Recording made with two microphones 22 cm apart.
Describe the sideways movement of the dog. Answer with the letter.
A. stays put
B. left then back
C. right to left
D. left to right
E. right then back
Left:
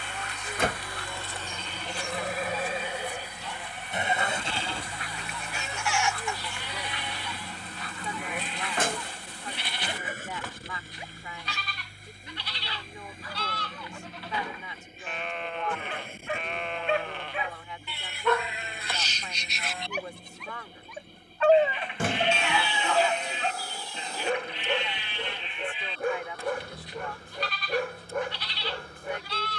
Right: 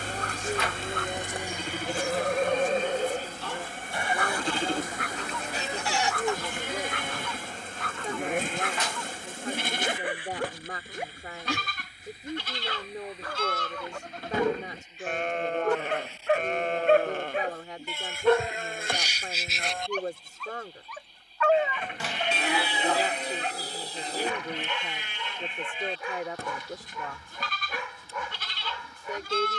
C.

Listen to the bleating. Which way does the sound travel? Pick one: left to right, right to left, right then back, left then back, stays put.
stays put.